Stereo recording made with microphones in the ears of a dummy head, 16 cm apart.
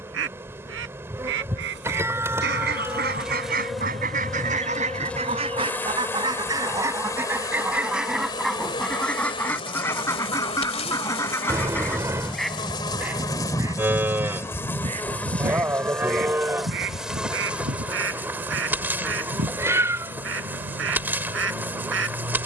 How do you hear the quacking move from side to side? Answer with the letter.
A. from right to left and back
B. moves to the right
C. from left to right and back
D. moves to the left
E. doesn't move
A.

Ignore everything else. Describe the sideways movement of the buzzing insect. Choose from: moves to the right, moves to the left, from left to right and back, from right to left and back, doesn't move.
from right to left and back.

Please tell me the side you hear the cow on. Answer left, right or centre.
centre.